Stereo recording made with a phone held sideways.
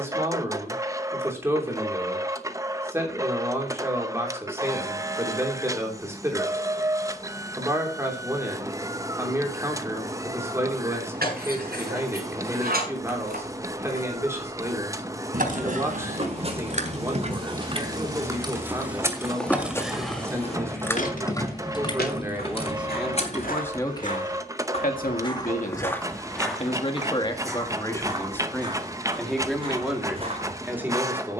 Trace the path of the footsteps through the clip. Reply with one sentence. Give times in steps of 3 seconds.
You can hear the footsteps not at all from 0 s, on the right from 15 s, in the centre from 18 s, on the left from 21 s and on the right from 27 s.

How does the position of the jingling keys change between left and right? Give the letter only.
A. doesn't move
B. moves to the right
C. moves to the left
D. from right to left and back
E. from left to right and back
C.